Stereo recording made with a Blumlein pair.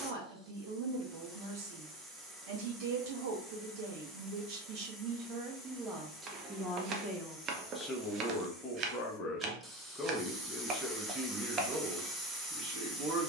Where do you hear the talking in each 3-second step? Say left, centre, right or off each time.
right, right, centre, centre, right.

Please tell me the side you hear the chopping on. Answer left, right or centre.
right.